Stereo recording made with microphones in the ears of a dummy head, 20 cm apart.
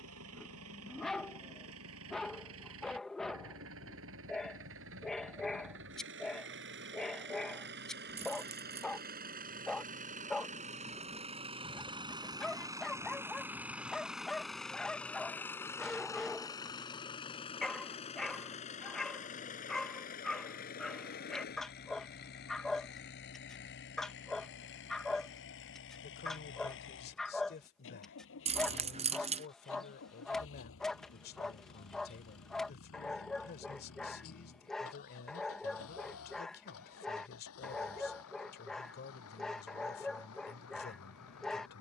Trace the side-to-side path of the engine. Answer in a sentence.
You can hear the engine travel towards the left.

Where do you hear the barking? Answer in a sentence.
You can hear the barking in the centre.